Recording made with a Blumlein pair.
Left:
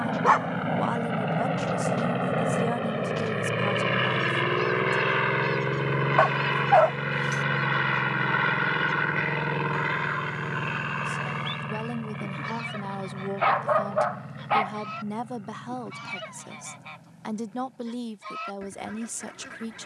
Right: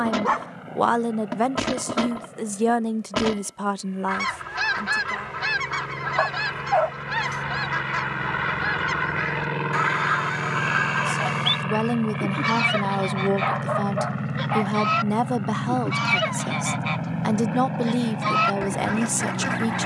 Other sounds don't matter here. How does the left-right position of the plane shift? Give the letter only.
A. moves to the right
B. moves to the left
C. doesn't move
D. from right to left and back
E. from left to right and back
A.